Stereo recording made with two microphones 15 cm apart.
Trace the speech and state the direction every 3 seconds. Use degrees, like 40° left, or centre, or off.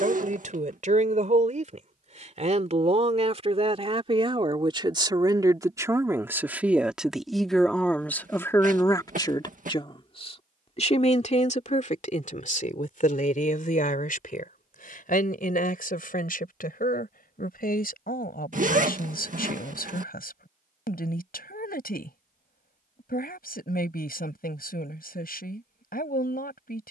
50° right, 30° right, centre, 40° left, 60° left, 70° left, 80° left, 80° left, 80° left.